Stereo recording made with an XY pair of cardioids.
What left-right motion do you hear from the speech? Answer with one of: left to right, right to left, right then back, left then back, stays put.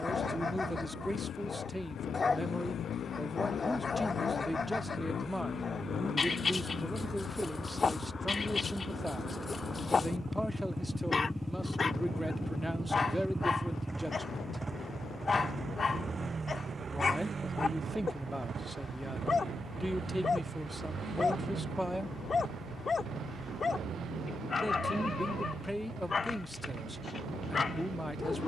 stays put.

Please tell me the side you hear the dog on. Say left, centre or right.
left.